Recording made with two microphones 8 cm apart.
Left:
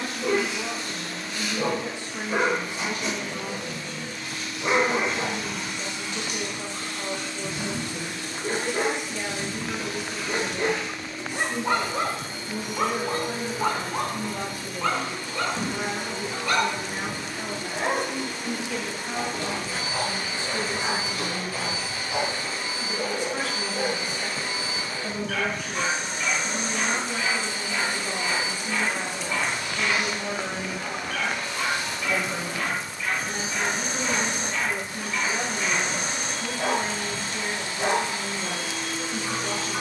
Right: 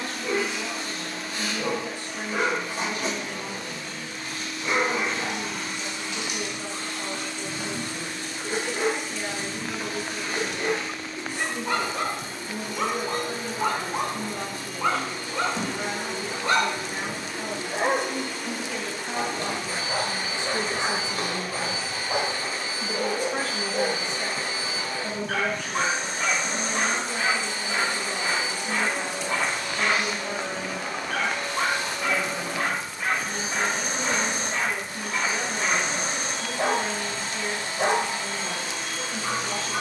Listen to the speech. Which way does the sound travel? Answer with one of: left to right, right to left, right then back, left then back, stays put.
right then back.